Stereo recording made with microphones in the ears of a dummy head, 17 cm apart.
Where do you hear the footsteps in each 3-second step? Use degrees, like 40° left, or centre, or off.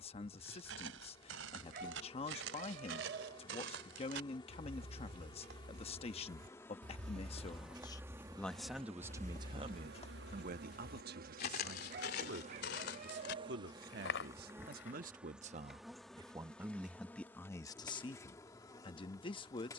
80° right, 60° right, 30° right, 40° left, 60° left, off, off.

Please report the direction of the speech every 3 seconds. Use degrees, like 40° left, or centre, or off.
30° left, 30° left, 20° left, 40° right, 60° right, 10° right, 30° left.